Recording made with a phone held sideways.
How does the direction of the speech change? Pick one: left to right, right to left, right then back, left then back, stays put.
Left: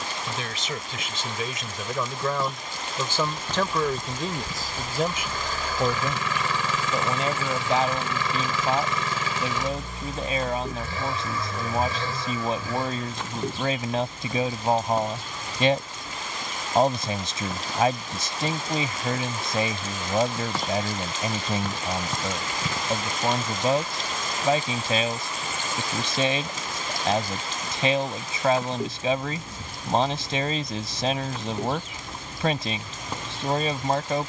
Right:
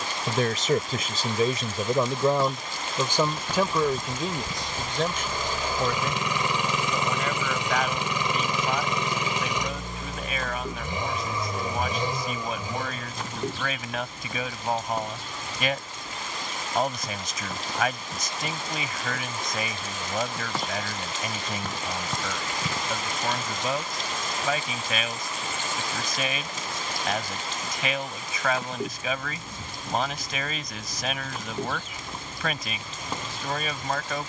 right to left.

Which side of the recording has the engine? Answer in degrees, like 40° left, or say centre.
20° right.